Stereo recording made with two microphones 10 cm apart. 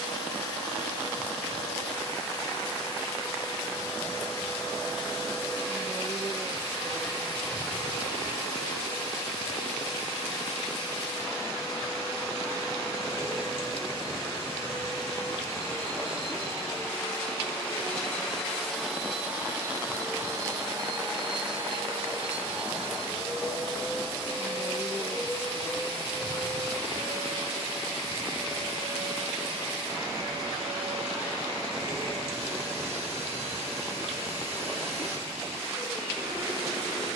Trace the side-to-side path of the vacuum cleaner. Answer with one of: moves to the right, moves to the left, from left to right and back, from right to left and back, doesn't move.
moves to the right.